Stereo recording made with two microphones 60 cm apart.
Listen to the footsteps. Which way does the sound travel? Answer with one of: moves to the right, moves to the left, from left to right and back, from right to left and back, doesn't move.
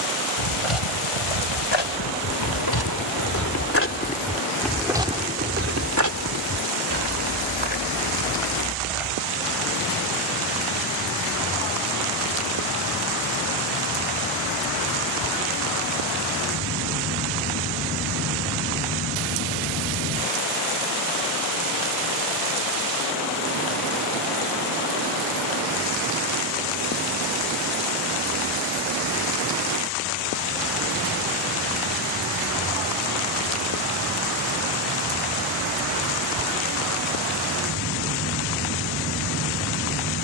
moves to the right.